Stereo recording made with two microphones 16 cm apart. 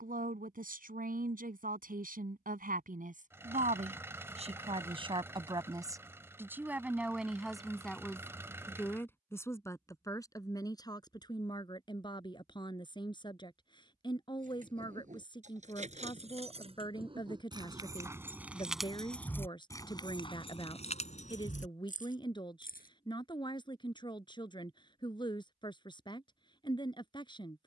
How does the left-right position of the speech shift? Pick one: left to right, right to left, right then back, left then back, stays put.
right to left.